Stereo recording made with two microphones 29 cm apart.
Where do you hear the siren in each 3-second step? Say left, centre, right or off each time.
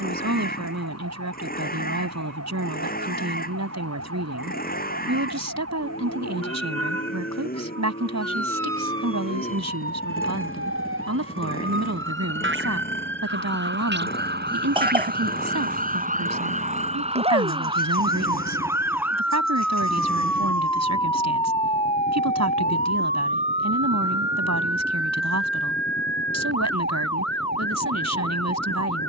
right, right, right, right, right, right, centre, left, left, left.